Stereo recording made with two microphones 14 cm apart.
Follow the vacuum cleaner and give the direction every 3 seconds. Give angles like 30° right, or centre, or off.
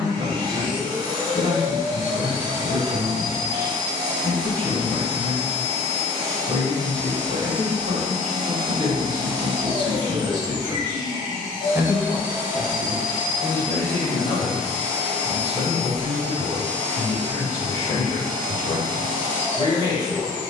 30° right, 30° right, 30° right, 30° right, 10° right, 10° left, 10° left.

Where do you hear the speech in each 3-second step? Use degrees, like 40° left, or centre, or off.
40° right, 40° right, 40° right, 30° right, 10° left, 30° left, 30° left.